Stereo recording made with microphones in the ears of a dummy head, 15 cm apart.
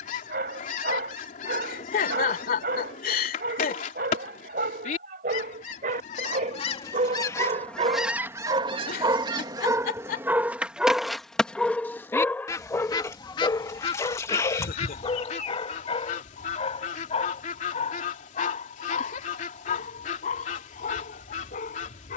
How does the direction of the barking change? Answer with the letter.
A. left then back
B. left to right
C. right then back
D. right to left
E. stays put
D.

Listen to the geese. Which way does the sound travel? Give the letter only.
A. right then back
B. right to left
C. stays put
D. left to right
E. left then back
A.